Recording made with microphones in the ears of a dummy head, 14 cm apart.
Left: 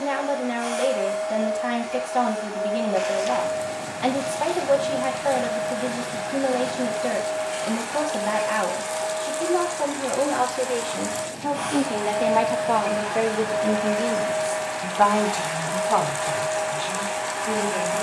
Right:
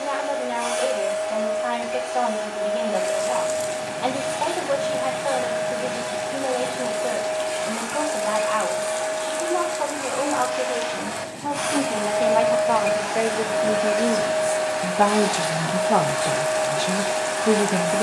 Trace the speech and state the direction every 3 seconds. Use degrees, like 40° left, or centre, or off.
20° left, 20° left, 20° left, 20° left, centre, 40° right.